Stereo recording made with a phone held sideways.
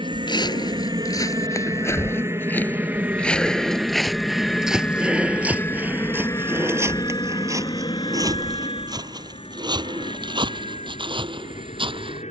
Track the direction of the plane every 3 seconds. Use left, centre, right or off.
right, centre, left, left.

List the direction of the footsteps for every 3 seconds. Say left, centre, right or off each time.
left, centre, right, right.